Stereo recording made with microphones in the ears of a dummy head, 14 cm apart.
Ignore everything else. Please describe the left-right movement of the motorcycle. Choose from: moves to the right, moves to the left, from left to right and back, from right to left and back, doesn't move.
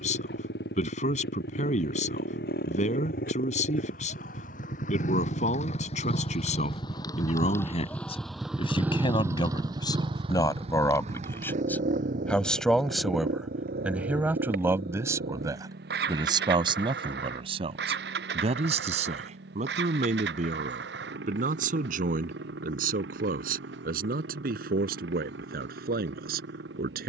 moves to the right.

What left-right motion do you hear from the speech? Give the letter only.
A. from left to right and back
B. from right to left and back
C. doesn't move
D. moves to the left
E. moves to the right
E.